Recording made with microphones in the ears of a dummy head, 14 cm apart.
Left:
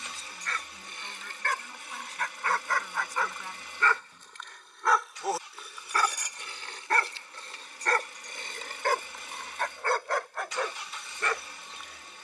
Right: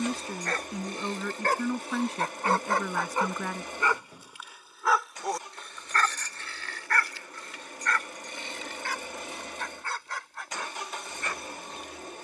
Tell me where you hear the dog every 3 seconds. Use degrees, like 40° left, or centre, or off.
30° right, 10° right, 30° left, 50° left.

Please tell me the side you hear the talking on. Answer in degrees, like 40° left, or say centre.
50° right.